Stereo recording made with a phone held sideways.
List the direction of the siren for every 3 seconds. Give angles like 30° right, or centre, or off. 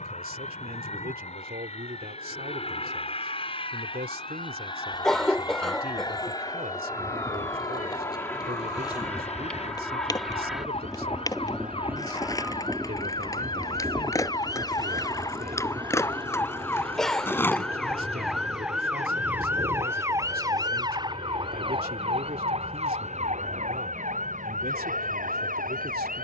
60° left, 50° left, 50° left, 40° left, 30° left, 10° left, 10° right, 40° right, 60° right.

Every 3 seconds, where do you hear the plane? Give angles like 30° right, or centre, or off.
50° left, 30° left, 20° left, centre, 20° right, 30° right, 40° right, 50° right, 60° right.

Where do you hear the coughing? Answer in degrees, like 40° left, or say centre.
centre.